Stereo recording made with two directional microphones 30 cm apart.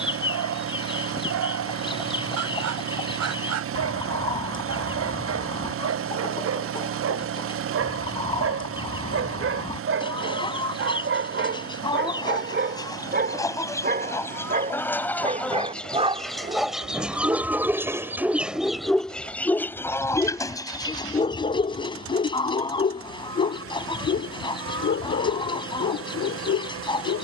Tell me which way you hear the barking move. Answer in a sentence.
You can hear the barking move to the left.